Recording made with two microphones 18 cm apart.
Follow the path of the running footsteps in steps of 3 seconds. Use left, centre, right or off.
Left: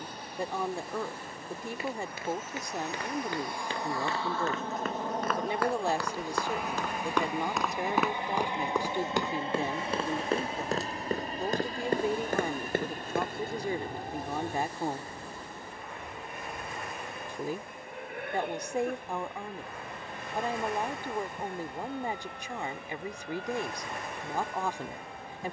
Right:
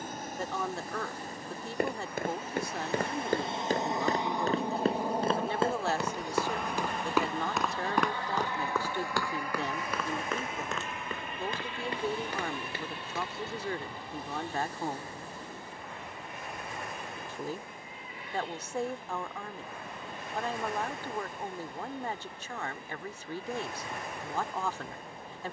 right, right, centre, left, left, off, off, off, off.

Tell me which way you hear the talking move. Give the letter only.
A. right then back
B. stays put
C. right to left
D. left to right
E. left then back
B.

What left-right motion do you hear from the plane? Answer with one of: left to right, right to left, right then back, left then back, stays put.
right to left.